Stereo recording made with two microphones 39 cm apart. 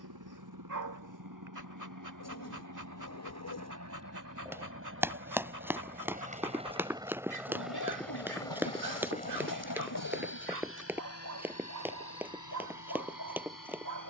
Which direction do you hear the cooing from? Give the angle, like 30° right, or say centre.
50° left.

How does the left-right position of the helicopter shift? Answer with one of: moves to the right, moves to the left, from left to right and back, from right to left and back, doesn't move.
moves to the left.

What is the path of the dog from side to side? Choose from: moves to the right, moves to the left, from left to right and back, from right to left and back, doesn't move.
doesn't move.